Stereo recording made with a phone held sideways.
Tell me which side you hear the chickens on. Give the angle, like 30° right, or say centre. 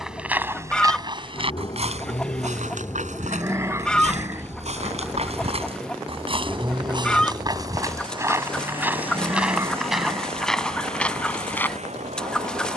10° left.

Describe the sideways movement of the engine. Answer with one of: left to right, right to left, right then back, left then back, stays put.
left to right.